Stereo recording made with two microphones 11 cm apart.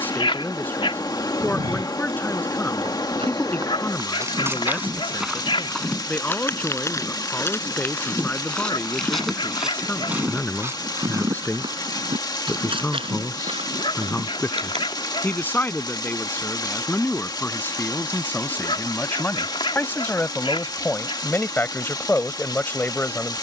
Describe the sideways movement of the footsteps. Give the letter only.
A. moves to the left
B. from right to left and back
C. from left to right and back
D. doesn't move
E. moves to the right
B.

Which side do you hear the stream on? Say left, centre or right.
left.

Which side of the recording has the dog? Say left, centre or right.
left.